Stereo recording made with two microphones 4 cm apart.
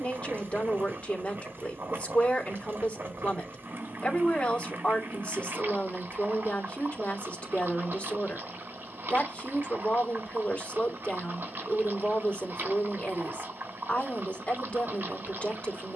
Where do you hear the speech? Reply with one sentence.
In this clip you hear the speech on the left.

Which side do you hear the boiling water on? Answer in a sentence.
You can hear the boiling water on the right.